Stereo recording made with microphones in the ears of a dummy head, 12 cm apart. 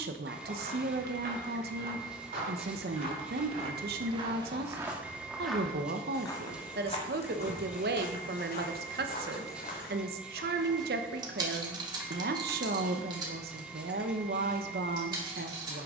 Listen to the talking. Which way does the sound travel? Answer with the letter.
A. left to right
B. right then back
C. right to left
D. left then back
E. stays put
E.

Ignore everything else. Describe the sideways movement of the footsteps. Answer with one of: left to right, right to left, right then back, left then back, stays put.
right to left.